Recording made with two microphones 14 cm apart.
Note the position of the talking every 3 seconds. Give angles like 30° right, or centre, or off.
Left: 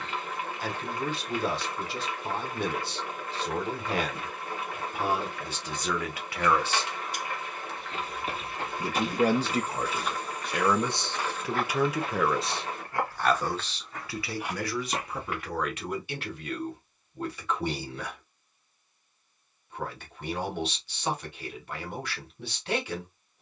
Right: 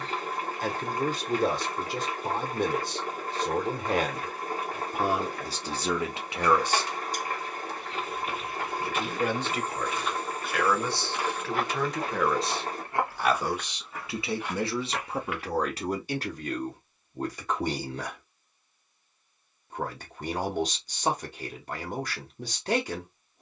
50° right, 40° right, centre, 30° left, 10° right, 40° right, 40° right, 40° right.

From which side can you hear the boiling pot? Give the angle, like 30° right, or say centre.
40° right.